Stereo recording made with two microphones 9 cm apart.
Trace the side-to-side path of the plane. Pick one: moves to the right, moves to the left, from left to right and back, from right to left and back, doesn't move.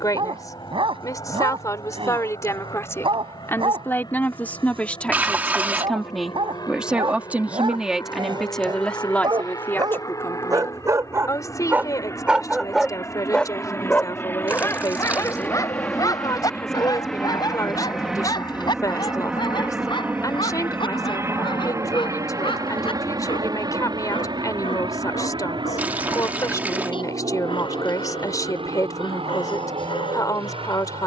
moves to the right.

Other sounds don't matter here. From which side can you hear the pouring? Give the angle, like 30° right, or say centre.
20° right.